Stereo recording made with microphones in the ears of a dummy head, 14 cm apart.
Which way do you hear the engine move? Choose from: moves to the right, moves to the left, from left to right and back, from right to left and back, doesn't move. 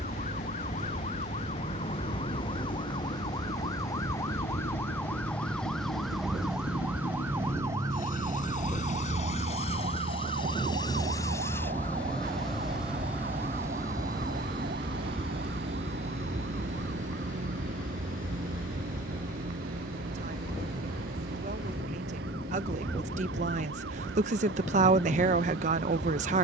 moves to the right.